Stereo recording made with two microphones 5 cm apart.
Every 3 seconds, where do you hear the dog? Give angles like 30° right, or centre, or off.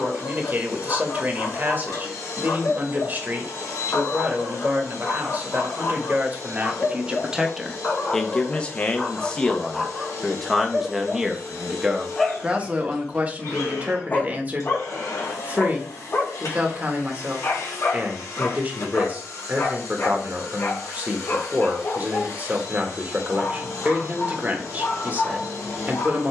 50° left, 50° left, 30° left, centre, 20° left, 50° left, 50° left, 50° left, 50° left.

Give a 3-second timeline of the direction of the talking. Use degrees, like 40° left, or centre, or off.
30° right, 30° right, 10° right, centre, 30° right, 30° right, 30° right, 30° right, 30° right.